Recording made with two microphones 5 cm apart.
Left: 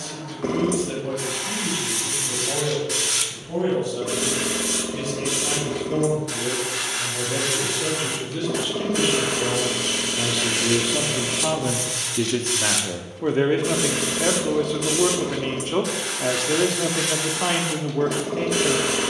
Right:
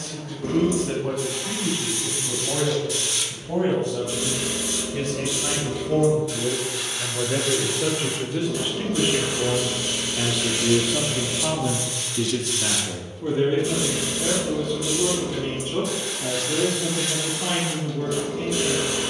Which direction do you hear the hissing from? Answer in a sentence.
You can hear the hissing on the left.